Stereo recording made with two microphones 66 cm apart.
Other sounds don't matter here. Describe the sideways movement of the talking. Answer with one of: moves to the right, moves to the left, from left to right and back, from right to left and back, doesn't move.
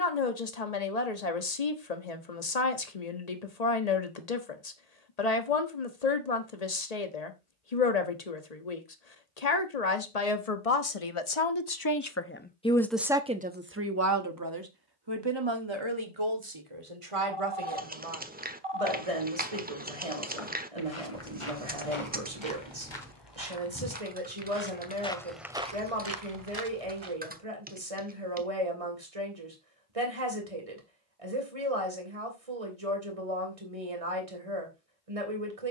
moves to the right.